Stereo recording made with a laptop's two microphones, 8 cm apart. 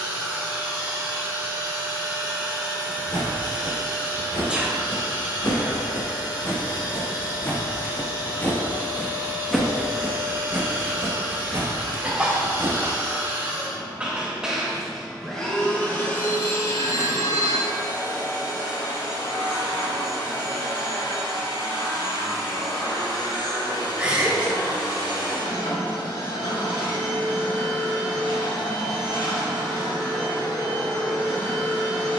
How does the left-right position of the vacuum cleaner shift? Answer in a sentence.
You can hear the vacuum cleaner move to the left.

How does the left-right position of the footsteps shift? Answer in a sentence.
In this clip you hear the footsteps move from left to right.